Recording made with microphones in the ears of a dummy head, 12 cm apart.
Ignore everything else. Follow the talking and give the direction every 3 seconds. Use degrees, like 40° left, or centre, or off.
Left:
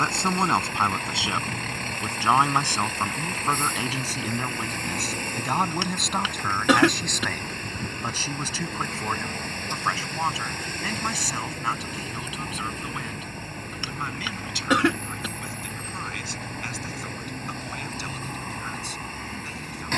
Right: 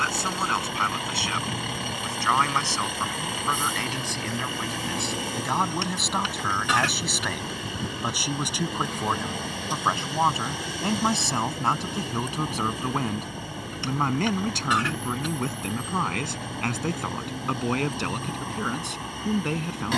20° left, 10° left, 10° right, 20° right, 30° right, 40° right, 50° right.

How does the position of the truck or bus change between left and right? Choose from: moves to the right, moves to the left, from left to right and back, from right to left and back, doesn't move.
doesn't move.